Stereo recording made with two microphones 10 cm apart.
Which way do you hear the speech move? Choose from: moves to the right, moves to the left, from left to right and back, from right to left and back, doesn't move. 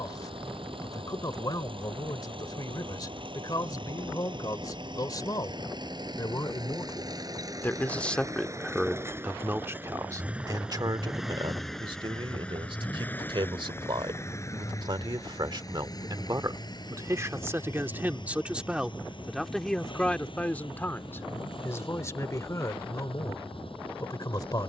from left to right and back.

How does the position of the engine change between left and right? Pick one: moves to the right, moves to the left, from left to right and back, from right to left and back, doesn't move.
moves to the left.